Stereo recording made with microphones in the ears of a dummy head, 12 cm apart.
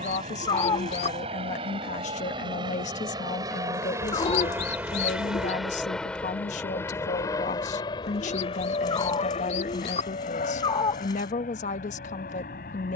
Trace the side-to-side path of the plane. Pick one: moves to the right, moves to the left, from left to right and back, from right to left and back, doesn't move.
moves to the left.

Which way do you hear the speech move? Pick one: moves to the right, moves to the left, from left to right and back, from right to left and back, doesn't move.
doesn't move.